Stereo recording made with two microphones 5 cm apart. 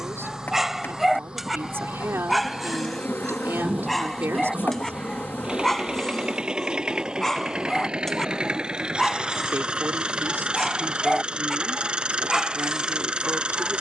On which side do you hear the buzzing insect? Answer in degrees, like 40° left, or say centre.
40° left.